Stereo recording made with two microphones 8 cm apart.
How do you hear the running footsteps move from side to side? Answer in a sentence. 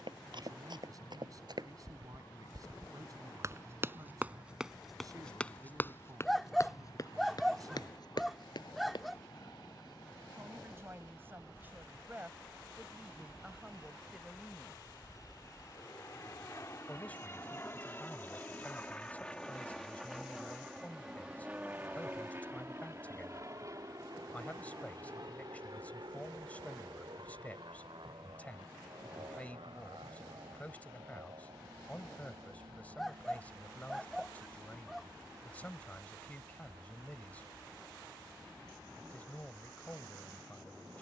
In this clip you hear the running footsteps move to the left.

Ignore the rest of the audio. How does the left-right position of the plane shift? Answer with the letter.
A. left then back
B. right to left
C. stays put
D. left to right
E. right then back
D.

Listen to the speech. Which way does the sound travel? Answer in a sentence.
You can hear the speech travel towards the left.